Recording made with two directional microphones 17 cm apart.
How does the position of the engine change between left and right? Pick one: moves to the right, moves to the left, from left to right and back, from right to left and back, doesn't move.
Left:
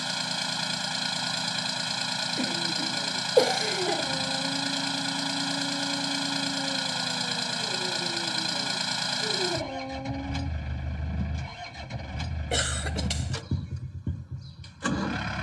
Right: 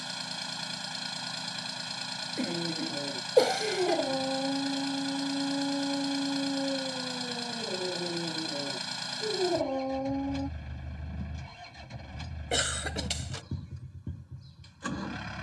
doesn't move.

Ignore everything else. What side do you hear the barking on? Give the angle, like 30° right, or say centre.
20° right.